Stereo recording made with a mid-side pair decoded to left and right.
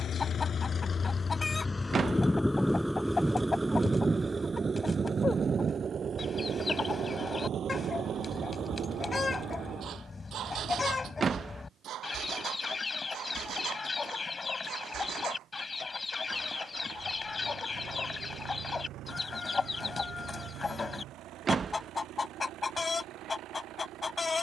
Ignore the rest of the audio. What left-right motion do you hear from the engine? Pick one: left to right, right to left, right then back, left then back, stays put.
left to right.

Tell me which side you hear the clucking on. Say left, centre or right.
left.